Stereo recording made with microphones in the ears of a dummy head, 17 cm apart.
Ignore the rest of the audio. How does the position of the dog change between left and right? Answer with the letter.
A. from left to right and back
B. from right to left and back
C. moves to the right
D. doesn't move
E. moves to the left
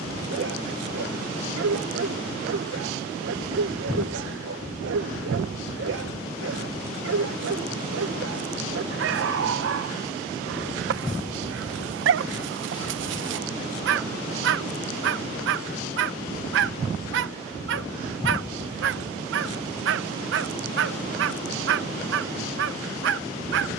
D.